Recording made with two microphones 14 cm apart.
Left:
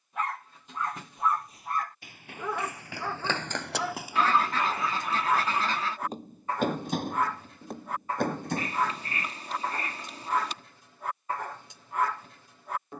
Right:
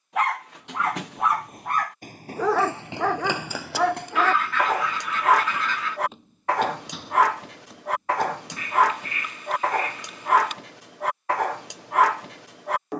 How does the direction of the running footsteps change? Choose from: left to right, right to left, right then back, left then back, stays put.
right to left.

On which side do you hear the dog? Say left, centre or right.
right.